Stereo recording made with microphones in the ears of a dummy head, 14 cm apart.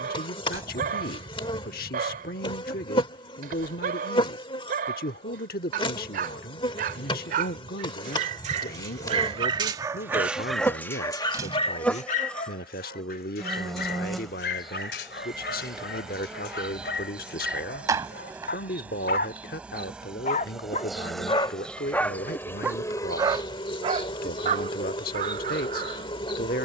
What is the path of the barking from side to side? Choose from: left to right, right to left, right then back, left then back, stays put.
left then back.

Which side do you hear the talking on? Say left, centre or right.
left.